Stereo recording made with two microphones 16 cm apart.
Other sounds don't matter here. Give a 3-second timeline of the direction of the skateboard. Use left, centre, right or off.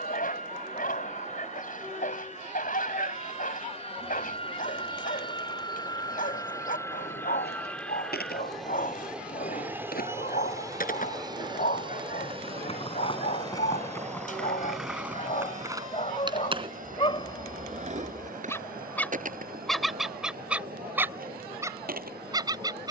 off, off, left, left, left, right, right, right.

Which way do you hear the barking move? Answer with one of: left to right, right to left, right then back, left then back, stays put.
left to right.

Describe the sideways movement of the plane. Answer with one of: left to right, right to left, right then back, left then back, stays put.
left to right.